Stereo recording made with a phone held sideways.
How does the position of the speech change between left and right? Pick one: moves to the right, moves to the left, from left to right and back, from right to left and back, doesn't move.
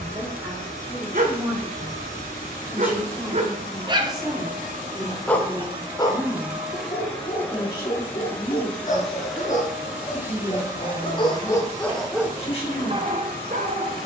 moves to the left.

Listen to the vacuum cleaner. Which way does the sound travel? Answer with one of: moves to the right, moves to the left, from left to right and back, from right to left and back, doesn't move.
from right to left and back.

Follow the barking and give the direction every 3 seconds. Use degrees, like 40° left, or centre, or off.
60° right, 10° right, 40° left, 40° left, 40° right.